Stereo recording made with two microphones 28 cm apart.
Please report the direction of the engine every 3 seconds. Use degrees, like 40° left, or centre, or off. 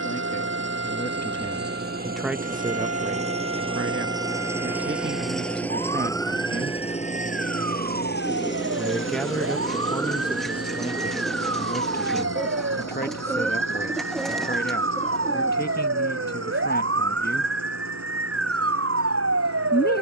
40° right, 10° right, 30° left, 60° left, 70° left, 80° left, 80° left.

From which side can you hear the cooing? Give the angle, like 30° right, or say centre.
centre.